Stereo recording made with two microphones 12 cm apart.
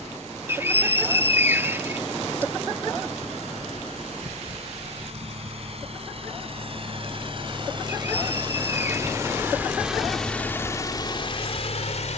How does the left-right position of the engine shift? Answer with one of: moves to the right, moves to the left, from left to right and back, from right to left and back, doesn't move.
moves to the left.